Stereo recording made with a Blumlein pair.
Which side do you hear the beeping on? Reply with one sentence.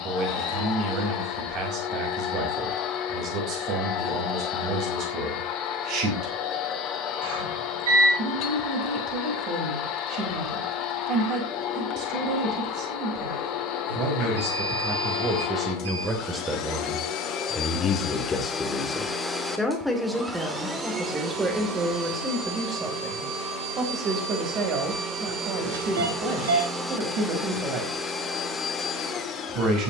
You can hear the beeping on the right.